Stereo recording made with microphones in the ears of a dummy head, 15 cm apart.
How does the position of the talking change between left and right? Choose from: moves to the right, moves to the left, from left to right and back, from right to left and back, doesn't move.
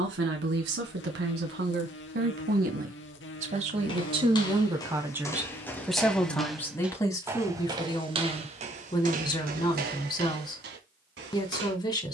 moves to the left.